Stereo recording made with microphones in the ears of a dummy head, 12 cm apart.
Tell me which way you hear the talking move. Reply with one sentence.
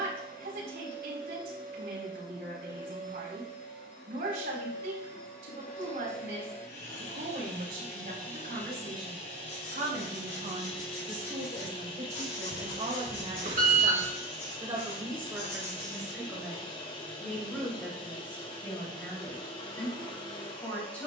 You can hear the talking move from right to left.